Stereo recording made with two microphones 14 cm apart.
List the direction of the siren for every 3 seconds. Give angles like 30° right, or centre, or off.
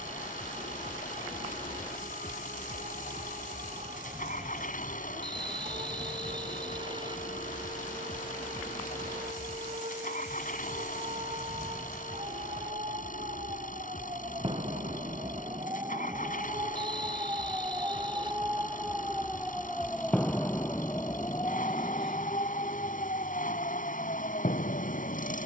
60° right, 60° right, 60° right, 50° right, 40° right, 30° right, centre, 40° left, 70° left.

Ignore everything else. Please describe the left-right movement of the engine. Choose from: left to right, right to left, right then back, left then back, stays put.
stays put.